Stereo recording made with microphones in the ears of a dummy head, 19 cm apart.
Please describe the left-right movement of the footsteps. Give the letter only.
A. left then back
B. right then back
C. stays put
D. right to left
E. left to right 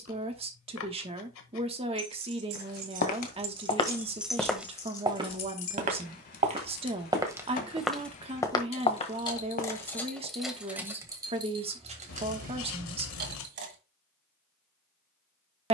B.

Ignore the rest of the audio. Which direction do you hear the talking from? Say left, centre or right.
right.